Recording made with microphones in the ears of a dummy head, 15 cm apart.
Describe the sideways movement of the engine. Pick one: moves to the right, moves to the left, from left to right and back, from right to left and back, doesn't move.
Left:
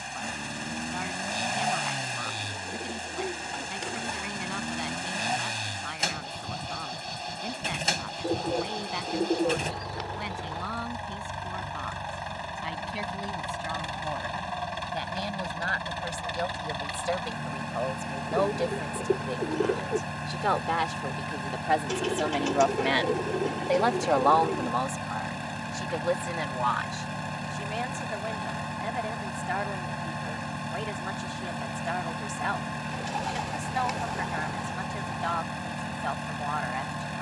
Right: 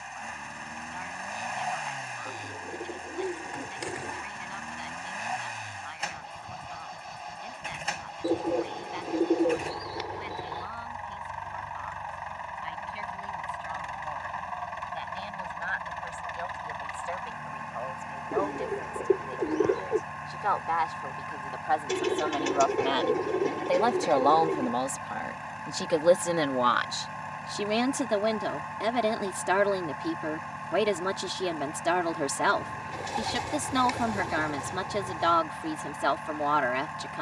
doesn't move.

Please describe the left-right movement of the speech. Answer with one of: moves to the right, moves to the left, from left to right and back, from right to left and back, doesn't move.
moves to the right.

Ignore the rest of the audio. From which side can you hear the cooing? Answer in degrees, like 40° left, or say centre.
10° right.